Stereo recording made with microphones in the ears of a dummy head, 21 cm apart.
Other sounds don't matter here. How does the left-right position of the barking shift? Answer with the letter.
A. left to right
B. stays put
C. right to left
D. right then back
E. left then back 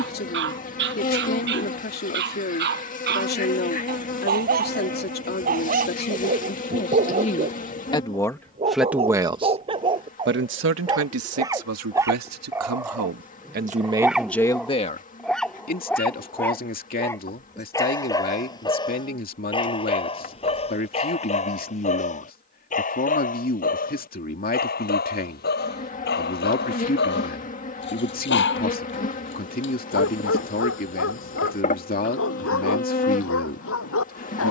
C.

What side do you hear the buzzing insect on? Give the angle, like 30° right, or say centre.
30° left.